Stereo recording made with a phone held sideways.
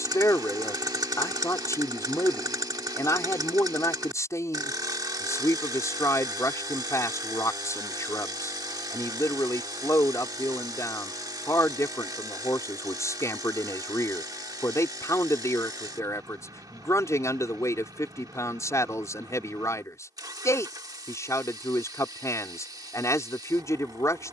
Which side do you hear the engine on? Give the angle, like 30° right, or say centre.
30° right.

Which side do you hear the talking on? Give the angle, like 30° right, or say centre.
20° left.